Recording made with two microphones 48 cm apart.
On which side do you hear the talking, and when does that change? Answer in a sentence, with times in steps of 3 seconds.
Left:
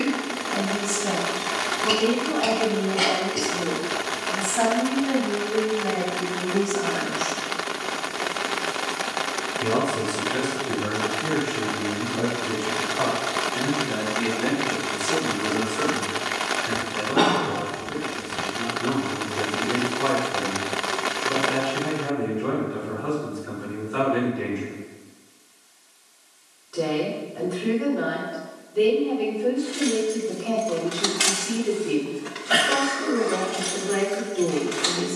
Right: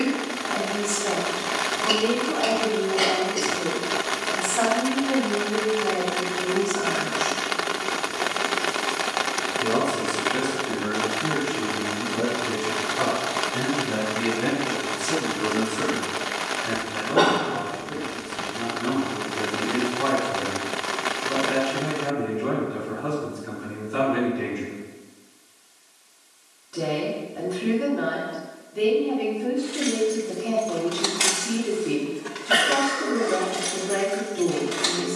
You can hear the talking on the left from 0 s, in the centre from 9 s and on the right from 12 s.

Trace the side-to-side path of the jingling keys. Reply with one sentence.
In this clip you hear the jingling keys go from the left side to the right.